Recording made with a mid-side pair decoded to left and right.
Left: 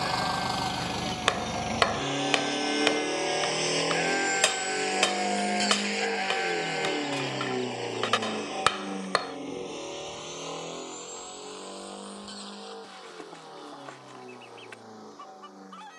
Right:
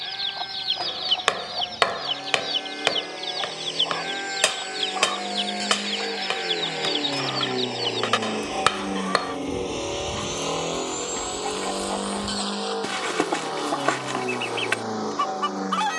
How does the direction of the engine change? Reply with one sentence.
In this clip you hear the engine move from left to right.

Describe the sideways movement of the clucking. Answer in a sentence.
In this clip you hear the clucking stay in one place.